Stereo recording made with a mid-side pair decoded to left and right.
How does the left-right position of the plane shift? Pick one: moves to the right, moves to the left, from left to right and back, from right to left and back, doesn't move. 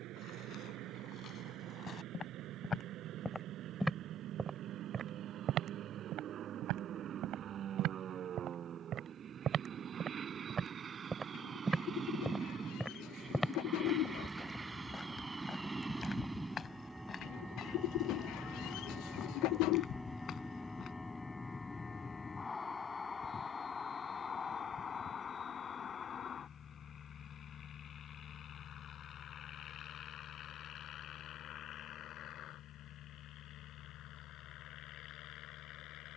moves to the left.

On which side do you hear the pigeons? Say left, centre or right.
left.